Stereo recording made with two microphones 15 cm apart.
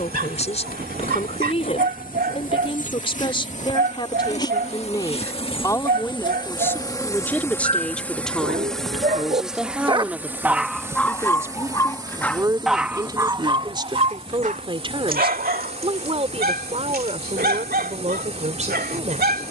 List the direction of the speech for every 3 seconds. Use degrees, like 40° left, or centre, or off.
40° left, 30° left, 10° left, 10° right, 30° right, 40° right, 50° right.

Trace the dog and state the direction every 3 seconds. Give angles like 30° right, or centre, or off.
80° right, 80° right, 70° right, 10° right, 30° right, 80° right, 80° right.